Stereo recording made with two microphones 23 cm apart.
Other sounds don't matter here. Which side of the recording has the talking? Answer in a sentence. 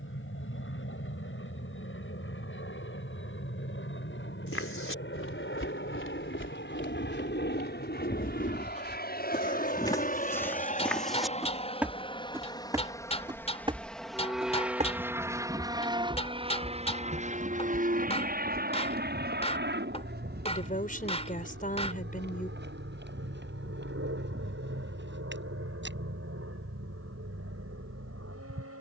In this clip you hear the talking on the left.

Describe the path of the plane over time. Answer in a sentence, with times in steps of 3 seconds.
You can hear the plane on the left from 0 s, in the centre from 12 s and on the right from 15 s.